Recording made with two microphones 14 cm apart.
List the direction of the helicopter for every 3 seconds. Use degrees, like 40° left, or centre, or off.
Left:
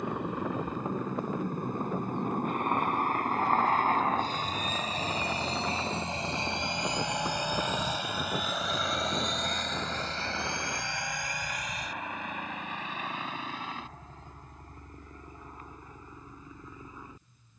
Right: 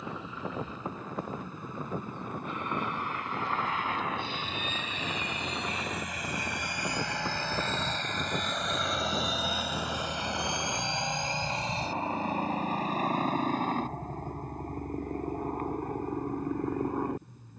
60° left, 40° left, 20° left, 20° right, 40° right, 50° right.